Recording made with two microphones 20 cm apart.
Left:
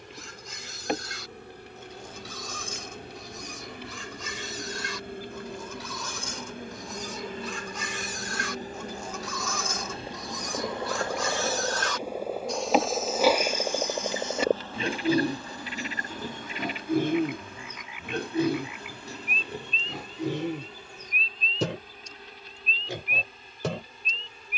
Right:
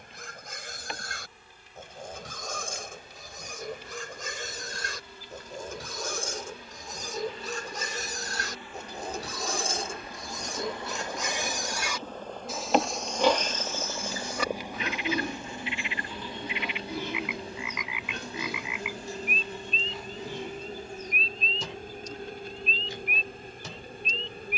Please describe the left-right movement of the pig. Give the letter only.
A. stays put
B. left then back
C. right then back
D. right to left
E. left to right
D.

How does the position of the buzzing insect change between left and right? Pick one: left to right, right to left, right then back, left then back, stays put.
left to right.